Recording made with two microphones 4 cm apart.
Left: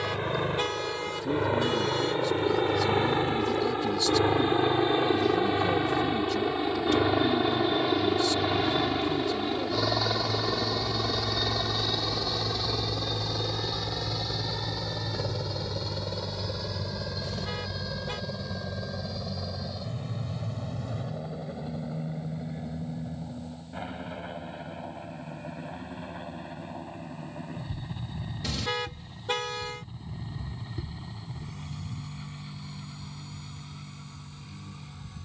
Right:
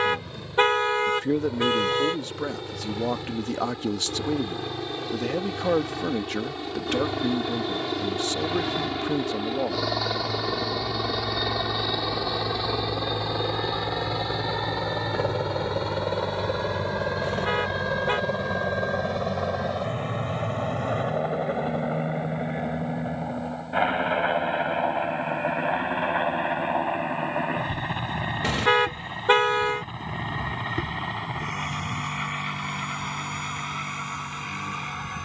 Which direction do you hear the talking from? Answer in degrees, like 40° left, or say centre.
60° right.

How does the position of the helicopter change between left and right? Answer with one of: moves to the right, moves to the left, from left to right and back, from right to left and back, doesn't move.
moves to the right.